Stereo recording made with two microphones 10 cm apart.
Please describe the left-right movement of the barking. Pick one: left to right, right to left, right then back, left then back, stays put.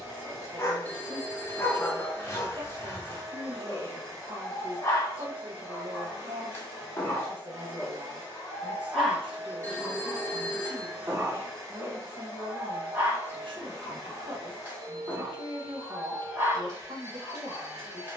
left to right.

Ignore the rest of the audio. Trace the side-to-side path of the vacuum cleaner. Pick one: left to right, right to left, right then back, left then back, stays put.
stays put.